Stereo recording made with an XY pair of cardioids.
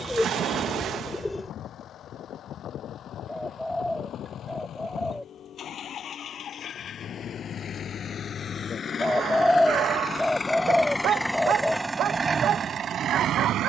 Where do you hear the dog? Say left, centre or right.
right.